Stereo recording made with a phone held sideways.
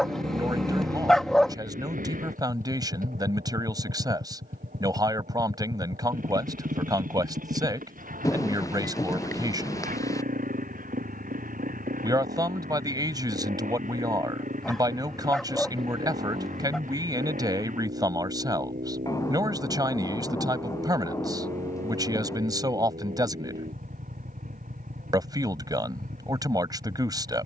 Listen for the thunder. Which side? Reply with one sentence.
In this clip you hear the thunder on the left.